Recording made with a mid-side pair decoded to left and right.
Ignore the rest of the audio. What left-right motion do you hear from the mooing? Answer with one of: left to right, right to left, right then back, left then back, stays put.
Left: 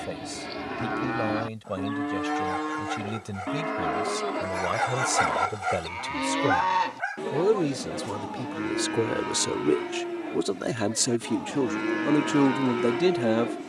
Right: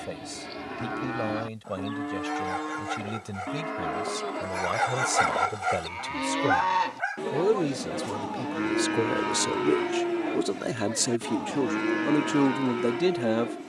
right then back.